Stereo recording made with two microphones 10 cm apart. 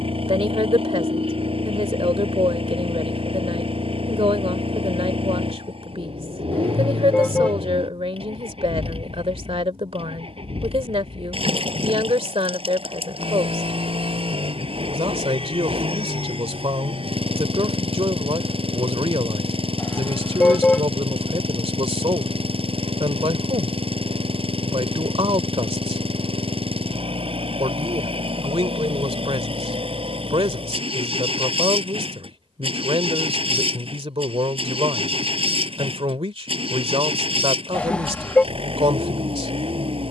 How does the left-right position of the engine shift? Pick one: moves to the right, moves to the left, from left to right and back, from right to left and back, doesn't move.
doesn't move.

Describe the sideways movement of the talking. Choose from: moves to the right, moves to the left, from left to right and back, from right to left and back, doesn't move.
doesn't move.